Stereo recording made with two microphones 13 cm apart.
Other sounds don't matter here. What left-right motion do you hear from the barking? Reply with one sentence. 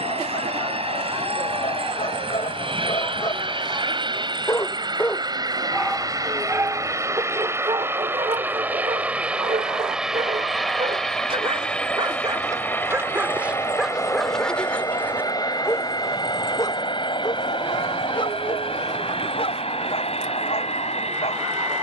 You can hear the barking move from left to right and back again.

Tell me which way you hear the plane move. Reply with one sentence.
In this clip you hear the plane move to the left.